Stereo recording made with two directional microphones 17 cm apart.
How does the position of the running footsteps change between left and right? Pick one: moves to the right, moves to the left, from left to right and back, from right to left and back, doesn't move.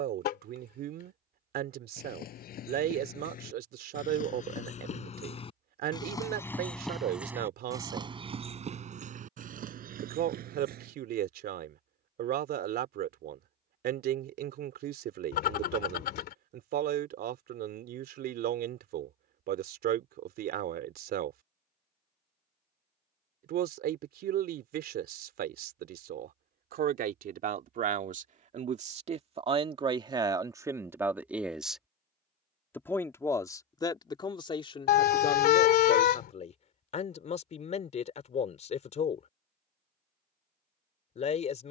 moves to the right.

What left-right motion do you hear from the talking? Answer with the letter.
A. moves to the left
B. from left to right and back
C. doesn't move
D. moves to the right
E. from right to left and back
A.